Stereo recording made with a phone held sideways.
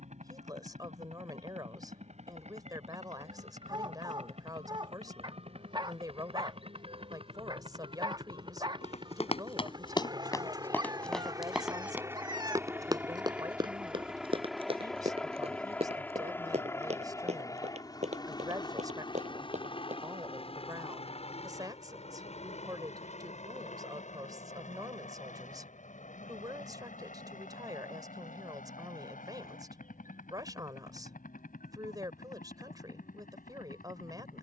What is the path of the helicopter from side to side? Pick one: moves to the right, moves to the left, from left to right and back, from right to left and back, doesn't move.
moves to the left.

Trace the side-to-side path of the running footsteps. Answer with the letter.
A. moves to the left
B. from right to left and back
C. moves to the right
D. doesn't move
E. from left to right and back
C.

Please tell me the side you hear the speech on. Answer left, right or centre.
right.